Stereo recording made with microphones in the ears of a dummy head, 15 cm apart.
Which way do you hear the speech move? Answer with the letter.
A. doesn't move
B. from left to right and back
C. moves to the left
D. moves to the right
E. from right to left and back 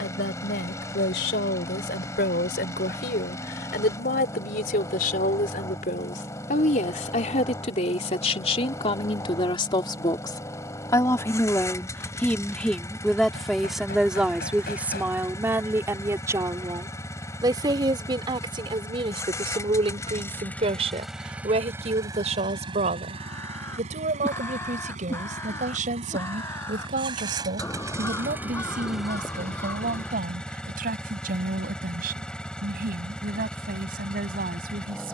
D.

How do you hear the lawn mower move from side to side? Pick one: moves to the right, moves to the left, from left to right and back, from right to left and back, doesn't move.
from left to right and back.